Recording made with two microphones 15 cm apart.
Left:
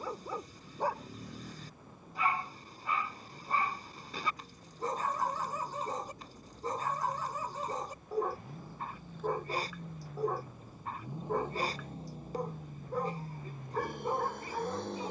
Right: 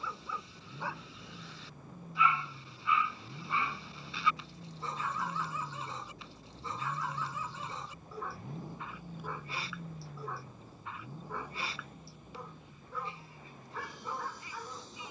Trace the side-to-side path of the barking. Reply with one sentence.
In this clip you hear the barking stay in one place.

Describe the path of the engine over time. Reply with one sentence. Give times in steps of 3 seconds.
In this clip you hear the engine on the right from 0 s, in the centre from 9 s and on the left from 12 s.